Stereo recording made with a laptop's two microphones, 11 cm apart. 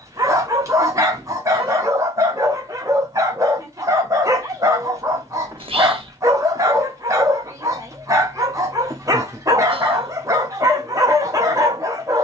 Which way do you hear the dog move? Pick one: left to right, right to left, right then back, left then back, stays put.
stays put.